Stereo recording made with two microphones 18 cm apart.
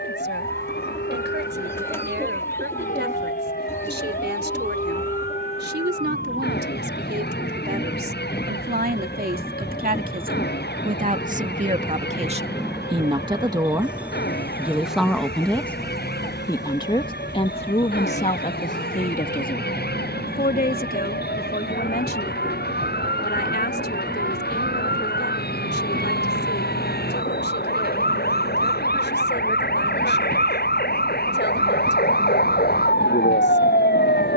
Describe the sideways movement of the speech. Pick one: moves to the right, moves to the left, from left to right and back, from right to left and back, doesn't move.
moves to the left.